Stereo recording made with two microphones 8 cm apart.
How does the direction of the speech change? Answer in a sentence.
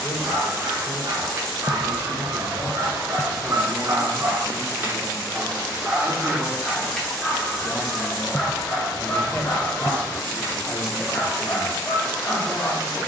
You can hear the speech go right and come back.